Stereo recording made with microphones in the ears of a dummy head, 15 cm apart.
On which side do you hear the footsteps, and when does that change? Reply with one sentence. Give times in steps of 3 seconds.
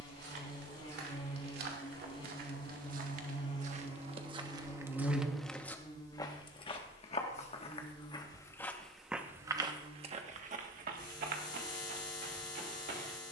You can hear the footsteps on the right from 0 s, on the left from 6 s and on the right from 9 s.